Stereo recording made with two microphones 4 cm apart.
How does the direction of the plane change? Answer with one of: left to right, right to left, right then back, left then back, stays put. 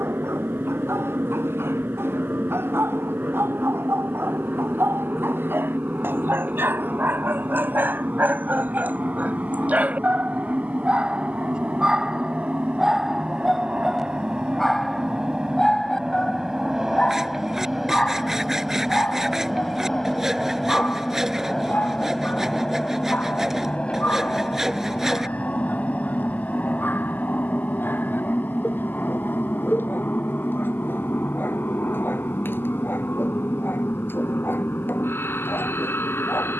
right to left.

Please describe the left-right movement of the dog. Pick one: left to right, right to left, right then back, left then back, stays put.
right to left.